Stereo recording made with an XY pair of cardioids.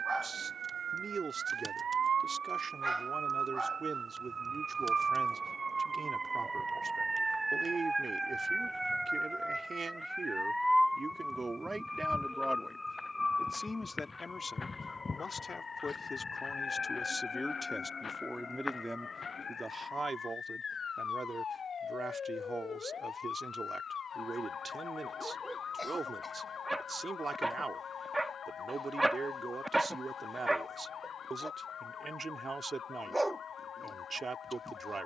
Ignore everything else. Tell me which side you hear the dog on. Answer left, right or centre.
centre.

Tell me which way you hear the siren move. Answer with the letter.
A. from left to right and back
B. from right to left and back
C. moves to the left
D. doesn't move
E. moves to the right
C.